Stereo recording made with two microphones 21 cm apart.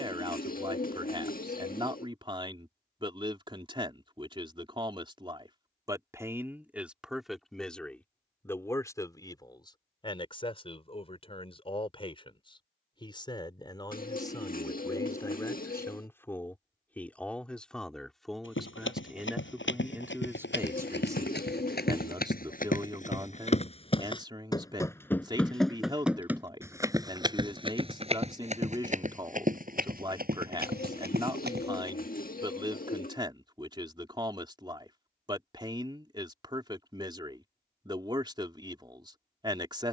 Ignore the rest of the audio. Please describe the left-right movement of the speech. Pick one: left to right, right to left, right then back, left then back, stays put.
left then back.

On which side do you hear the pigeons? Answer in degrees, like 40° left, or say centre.
40° left.